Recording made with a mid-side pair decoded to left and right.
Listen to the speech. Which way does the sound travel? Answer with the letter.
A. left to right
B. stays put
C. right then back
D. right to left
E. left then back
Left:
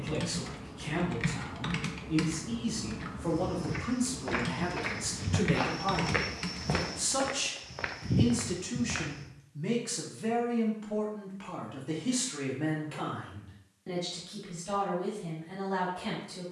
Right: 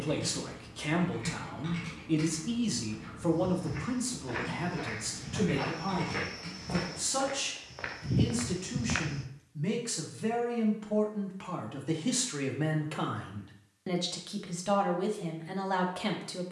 E.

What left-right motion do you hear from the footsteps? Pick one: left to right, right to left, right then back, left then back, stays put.
left to right.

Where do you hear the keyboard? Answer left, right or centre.
left.